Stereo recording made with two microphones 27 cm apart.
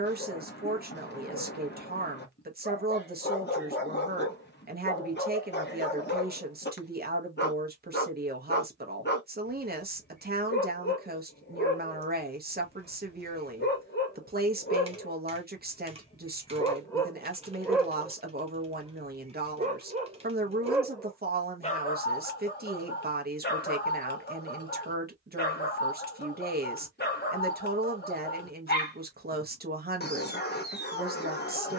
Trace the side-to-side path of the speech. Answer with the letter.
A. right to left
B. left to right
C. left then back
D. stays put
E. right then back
D.